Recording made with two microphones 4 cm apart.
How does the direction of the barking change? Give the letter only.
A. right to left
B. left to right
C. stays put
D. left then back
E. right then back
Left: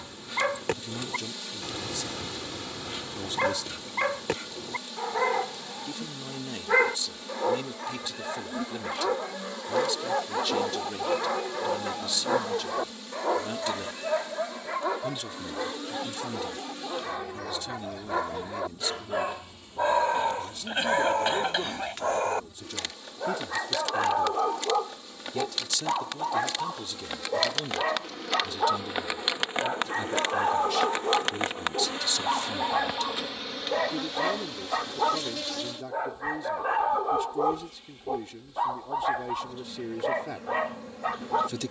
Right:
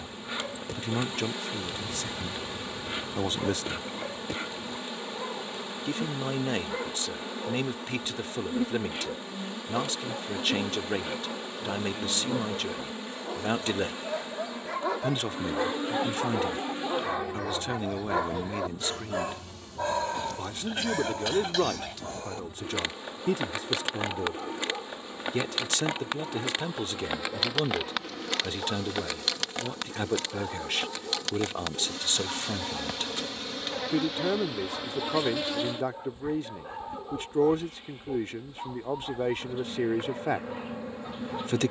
E.